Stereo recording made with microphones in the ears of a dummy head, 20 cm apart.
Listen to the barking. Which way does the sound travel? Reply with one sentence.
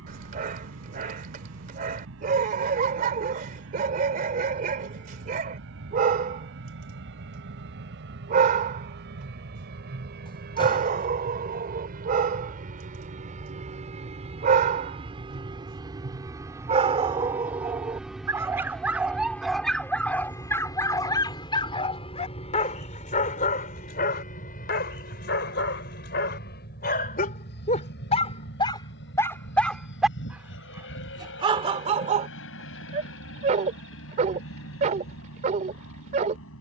In this clip you hear the barking move from right to left and back again.